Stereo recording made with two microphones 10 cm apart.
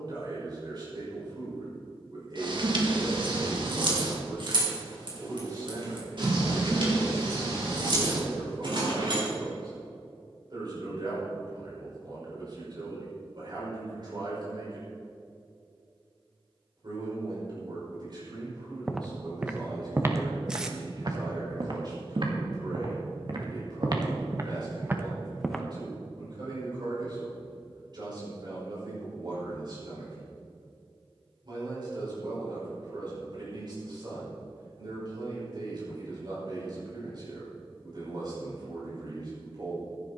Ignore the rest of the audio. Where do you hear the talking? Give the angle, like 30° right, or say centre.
50° right.